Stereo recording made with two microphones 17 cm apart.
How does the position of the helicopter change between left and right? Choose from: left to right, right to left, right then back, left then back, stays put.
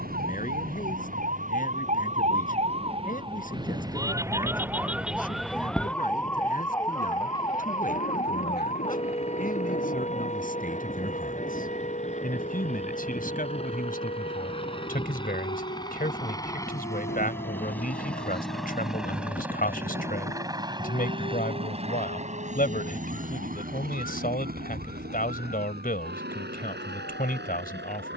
left to right.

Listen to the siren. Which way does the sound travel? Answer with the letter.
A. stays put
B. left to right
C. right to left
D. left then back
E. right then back
C.